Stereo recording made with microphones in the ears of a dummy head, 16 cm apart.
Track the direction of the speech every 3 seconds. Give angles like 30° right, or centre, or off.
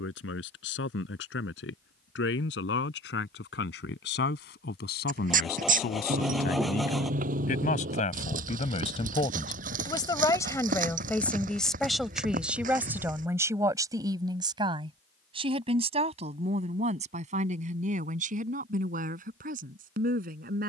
70° left, 60° left, 50° left, 20° left, 20° right, 40° right, 50° right.